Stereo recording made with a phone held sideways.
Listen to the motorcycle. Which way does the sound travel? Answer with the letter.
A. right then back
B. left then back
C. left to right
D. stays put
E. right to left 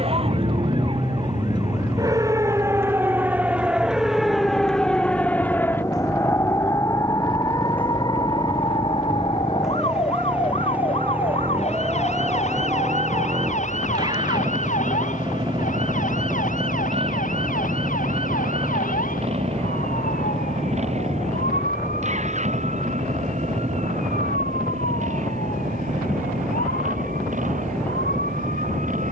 C.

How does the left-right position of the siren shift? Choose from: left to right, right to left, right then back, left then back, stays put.
right to left.